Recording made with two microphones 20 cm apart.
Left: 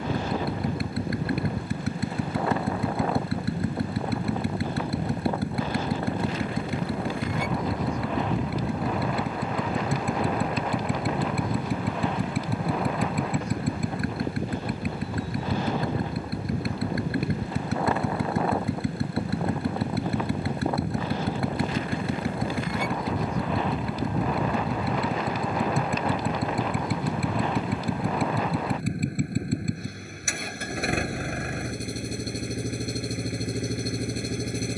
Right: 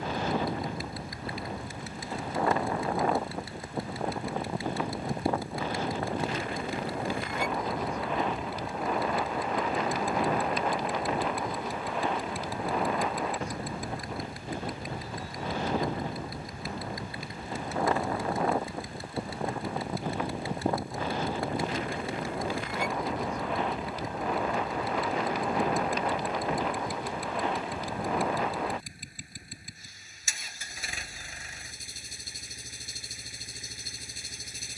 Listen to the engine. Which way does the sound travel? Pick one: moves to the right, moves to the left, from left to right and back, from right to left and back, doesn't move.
doesn't move.